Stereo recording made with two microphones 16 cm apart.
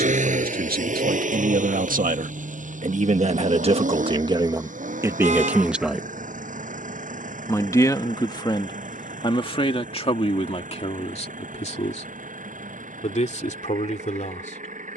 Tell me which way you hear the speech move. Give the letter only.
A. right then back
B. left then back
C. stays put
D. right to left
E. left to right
D.